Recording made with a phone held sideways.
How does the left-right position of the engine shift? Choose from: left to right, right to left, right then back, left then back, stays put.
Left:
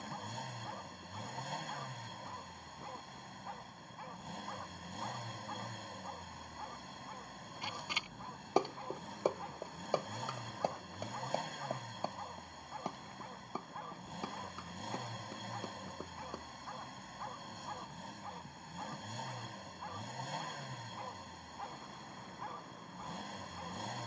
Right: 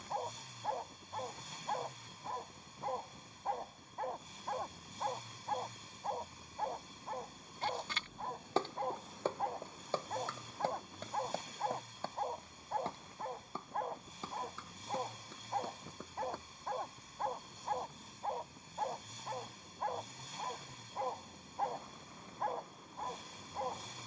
stays put.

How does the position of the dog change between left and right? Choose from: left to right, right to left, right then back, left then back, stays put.
stays put.